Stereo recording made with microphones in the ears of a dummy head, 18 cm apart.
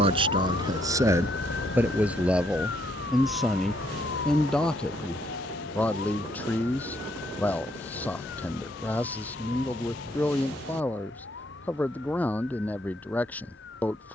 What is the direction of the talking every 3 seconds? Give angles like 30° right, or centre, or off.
10° right, centre, 10° left, 10° left, 10° left.